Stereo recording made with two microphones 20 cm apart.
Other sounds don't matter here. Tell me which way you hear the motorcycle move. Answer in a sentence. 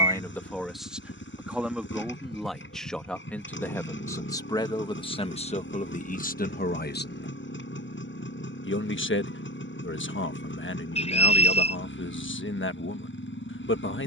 In this clip you hear the motorcycle stay in one place.